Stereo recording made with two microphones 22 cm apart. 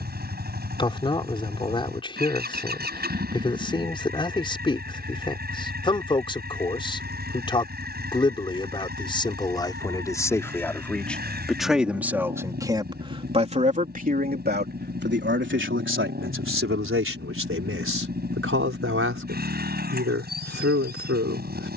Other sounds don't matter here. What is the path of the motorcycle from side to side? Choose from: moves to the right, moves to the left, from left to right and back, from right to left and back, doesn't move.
doesn't move.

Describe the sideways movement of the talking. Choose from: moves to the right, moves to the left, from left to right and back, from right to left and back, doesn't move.
moves to the right.